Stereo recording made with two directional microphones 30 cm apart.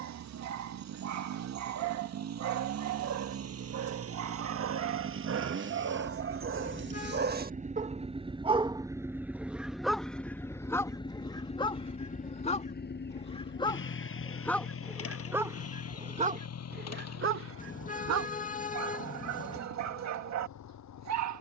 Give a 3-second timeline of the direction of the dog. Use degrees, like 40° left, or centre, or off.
70° right, 60° right, 30° right, 10° left, 10° left, 30° right, 60° right.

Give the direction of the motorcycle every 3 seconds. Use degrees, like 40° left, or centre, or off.
60° right, 50° right, 20° right, 10° left, 40° left, 50° left, 60° left.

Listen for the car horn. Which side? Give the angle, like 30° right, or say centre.
30° left.